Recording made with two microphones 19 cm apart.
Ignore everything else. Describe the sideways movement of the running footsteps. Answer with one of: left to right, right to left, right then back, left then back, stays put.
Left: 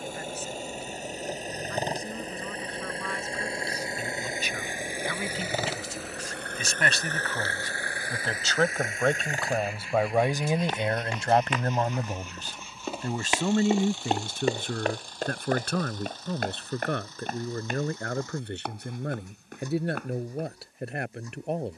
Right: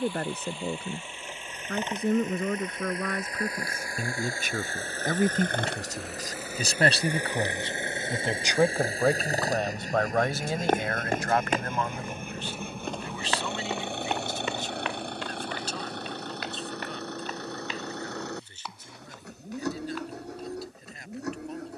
right to left.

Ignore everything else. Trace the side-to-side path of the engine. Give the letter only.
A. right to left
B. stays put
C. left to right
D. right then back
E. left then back
C.